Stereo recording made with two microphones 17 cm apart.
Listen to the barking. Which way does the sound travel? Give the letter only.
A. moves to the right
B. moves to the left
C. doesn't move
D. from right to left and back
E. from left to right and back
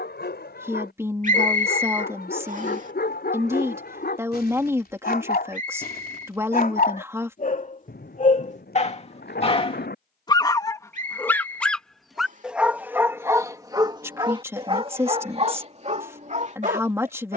A.